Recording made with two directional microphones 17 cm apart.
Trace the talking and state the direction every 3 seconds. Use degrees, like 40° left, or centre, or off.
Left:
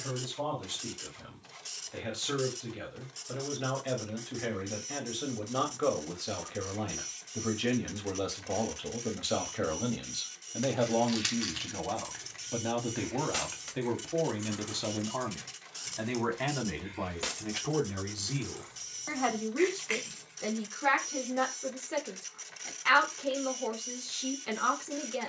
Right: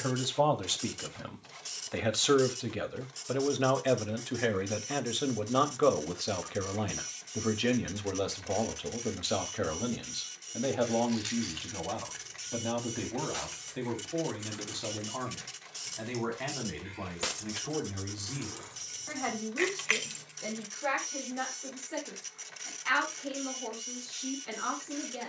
60° right, 40° right, 20° right, centre, 20° left, 20° left, 30° left, 30° left, 30° left.